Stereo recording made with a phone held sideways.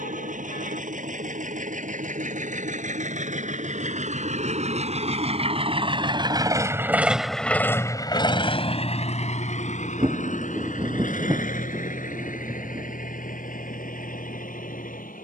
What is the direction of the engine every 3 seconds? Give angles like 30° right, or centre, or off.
70° right, 60° right, 10° left, 70° left, 80° left.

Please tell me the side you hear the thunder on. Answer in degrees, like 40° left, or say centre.
20° right.